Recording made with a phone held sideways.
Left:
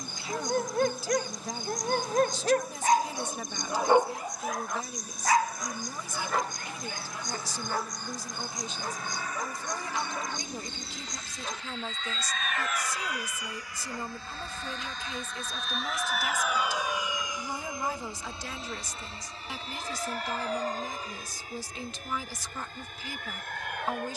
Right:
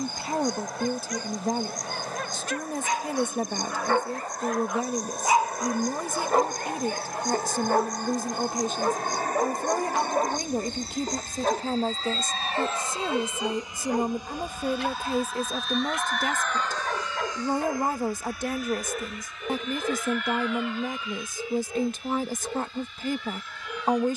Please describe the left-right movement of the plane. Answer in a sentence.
In this clip you hear the plane move from right to left.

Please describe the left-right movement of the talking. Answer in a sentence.
You can hear the talking stay put.